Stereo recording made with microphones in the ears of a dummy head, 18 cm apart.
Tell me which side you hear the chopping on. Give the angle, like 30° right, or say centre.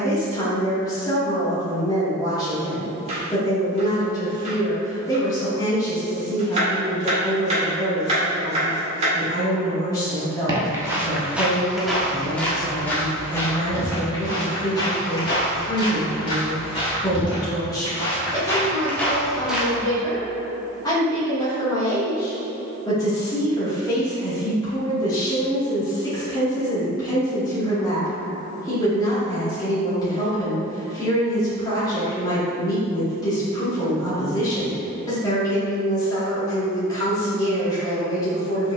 30° right.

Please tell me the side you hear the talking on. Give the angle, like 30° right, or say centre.
20° left.